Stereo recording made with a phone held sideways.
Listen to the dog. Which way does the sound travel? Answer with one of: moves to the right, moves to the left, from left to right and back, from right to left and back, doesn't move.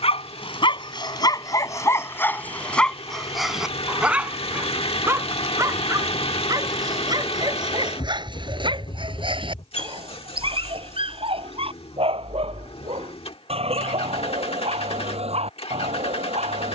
moves to the right.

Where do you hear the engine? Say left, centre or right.
left.